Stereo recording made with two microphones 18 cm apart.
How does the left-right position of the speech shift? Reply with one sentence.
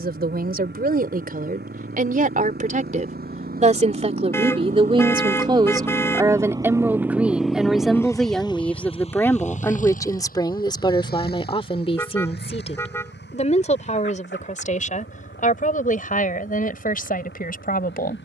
You can hear the speech travel towards the left.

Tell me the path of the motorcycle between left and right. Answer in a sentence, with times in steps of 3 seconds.
In this clip you hear the motorcycle on the right from 0 s, in the centre from 6 s and on the left from 9 s.